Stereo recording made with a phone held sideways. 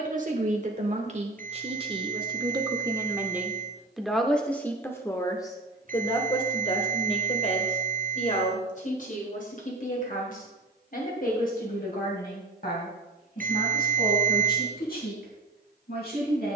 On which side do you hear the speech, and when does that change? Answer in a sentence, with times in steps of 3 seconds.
You can hear the speech on the right from 0 s, in the centre from 3 s and on the left from 6 s.